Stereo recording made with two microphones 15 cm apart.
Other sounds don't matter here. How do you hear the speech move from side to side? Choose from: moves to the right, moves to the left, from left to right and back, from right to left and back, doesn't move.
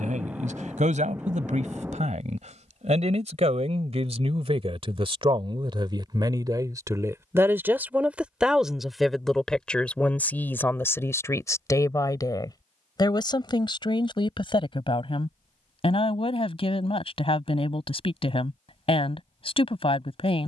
moves to the left.